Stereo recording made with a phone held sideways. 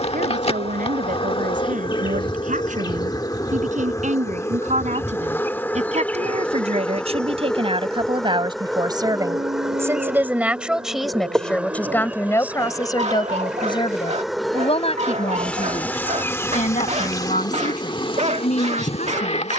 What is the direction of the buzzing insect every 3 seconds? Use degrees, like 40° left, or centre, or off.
40° left, 20° left, 10° left, 10° right, 10° right, 20° left, 40° left.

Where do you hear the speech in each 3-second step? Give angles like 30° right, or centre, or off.
70° right, 60° right, 40° right, 10° right, 30° left, 60° left, 60° left.